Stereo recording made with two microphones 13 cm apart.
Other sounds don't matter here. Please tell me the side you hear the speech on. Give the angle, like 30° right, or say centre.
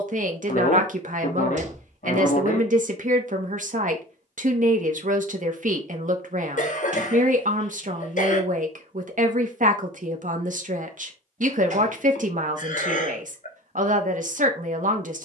70° right.